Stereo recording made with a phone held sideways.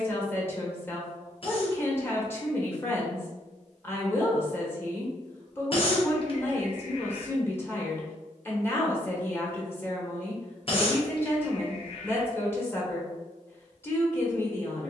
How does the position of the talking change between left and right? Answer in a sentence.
In this clip you hear the talking stay in one place.